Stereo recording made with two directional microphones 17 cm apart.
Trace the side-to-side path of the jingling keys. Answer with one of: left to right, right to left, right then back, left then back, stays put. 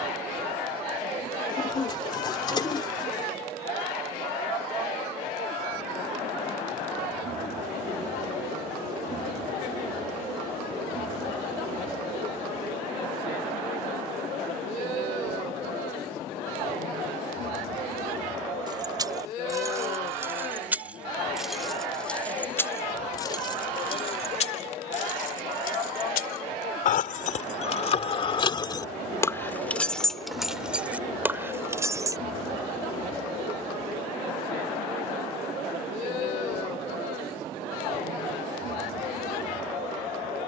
left then back.